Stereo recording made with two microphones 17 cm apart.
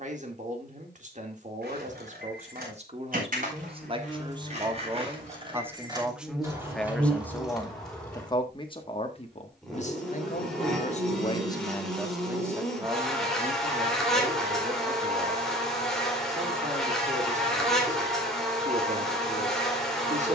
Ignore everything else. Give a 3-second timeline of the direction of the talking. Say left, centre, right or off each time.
right, right, centre, left, right, right, right.